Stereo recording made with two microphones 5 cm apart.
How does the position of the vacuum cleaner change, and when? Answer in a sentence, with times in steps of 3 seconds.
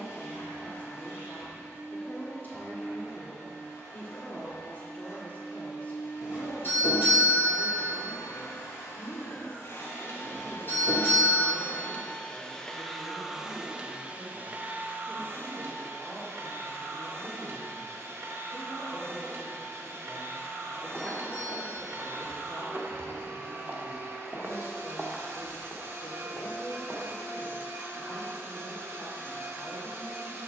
You can hear the vacuum cleaner on the left from 0 s, in the centre from 12 s and on the right from 15 s.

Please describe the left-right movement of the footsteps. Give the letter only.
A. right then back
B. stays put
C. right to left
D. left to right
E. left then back
A.